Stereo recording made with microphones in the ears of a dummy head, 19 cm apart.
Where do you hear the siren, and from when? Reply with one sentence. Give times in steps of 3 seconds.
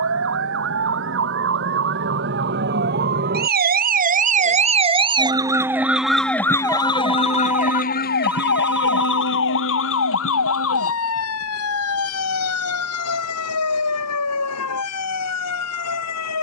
You can hear the siren on the right from 0 s and on the left from 6 s.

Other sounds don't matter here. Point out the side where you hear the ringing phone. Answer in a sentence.
You can hear the ringing phone in the centre.